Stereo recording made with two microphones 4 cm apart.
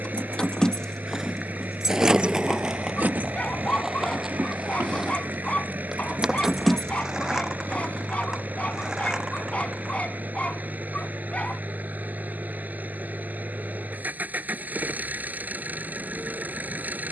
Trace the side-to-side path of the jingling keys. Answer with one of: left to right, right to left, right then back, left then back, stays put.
right then back.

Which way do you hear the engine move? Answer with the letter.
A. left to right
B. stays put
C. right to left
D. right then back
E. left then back
B.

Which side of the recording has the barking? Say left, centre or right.
left.